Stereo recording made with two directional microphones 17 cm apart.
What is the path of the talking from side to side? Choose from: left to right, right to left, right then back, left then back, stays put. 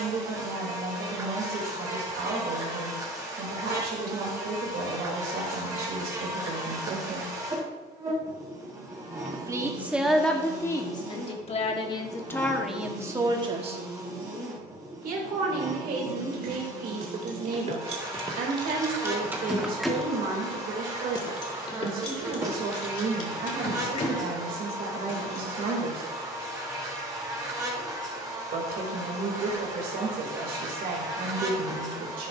left then back.